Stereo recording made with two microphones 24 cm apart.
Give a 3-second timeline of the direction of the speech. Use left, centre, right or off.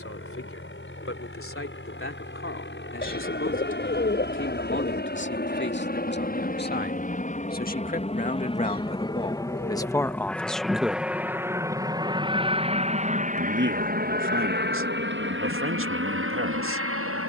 left, left, left, centre, right, right.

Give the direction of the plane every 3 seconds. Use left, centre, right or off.
left, left, left, centre, right, right.